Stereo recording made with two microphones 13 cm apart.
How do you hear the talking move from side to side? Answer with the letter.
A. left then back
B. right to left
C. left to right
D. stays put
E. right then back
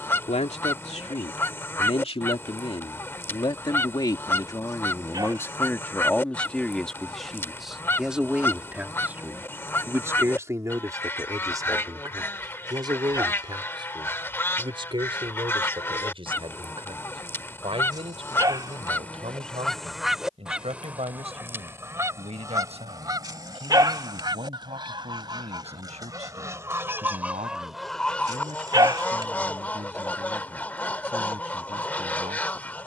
C.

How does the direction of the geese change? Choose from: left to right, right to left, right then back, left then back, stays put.
right then back.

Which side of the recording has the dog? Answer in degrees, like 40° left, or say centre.
30° right.